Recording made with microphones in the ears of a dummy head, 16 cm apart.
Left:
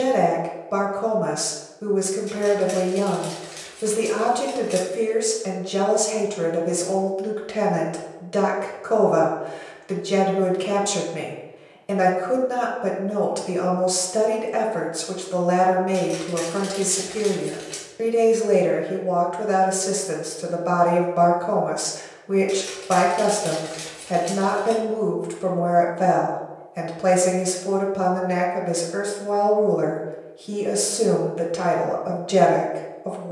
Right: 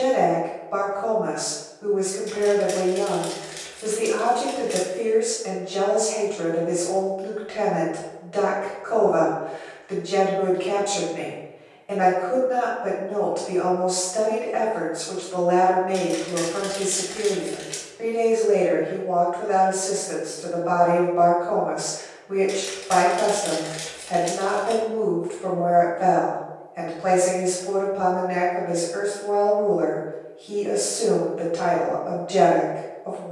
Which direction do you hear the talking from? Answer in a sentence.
You can hear the talking on the left.